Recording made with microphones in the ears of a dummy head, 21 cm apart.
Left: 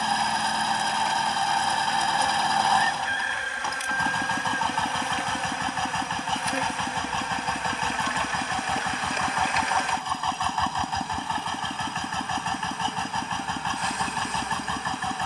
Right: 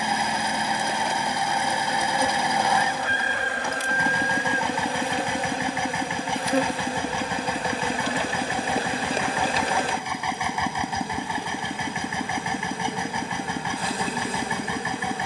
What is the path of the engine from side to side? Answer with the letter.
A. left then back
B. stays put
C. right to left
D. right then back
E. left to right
B.